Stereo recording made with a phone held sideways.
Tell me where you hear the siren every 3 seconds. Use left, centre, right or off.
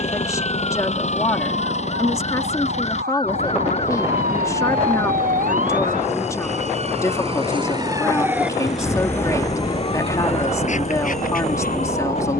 right, right, right, left.